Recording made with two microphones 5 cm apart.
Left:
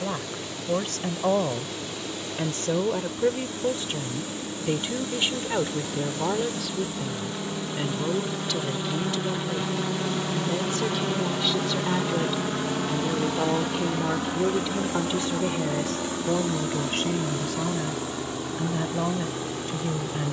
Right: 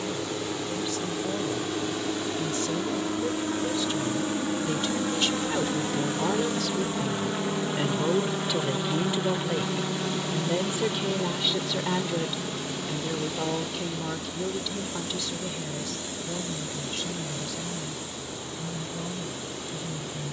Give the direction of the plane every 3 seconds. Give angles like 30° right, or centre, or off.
50° right, 40° right, 20° right, 10° left, 40° left, 60° left, 70° left.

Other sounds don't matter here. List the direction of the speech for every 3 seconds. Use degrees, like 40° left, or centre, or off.
50° left, 30° left, centre, 10° right, 20° left, 50° left, 60° left.